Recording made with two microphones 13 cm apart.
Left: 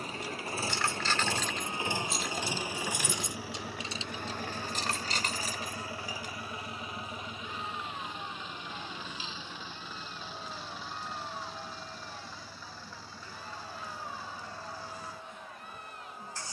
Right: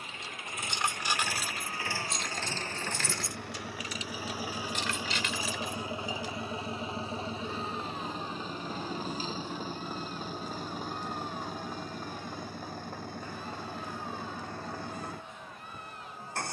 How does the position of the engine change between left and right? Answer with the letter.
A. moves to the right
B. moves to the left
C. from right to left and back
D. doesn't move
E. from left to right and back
A.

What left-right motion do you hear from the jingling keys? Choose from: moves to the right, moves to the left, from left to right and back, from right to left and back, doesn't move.
moves to the left.